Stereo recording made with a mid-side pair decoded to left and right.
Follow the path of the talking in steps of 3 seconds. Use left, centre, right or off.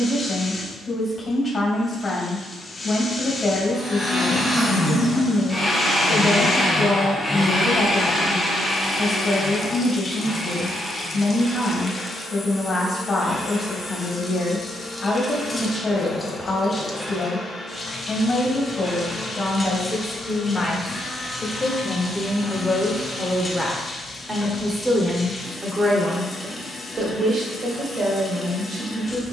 left, left, left, left, left, left, left, centre, right, right.